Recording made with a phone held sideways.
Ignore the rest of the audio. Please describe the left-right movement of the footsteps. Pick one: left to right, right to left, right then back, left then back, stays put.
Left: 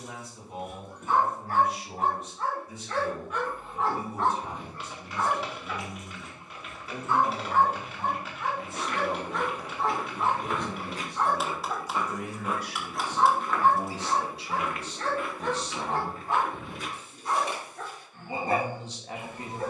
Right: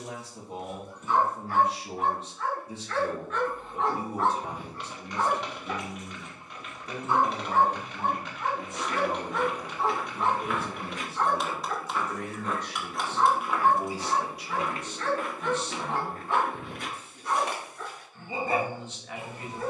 left to right.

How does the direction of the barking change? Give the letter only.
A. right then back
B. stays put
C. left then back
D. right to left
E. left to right
A.